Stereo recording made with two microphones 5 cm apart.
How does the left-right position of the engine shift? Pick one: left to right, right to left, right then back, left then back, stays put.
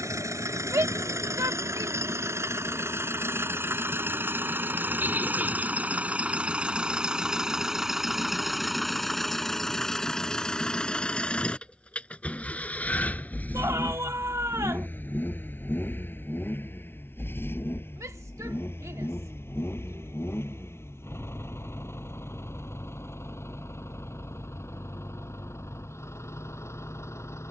right to left.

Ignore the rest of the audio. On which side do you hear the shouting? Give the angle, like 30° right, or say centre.
70° right.